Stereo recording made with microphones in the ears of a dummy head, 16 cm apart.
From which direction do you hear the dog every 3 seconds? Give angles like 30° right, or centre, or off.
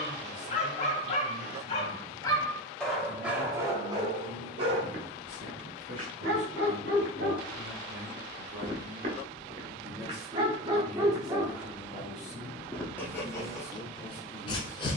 30° left, 30° right, 50° right, 20° right, 20° left.